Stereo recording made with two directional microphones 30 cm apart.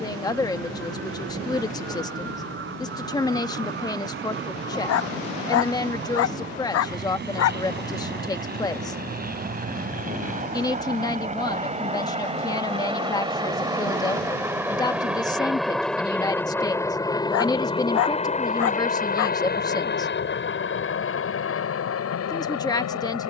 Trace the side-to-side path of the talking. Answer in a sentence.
In this clip you hear the talking stay put.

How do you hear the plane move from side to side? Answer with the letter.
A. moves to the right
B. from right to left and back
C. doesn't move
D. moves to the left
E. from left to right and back
D.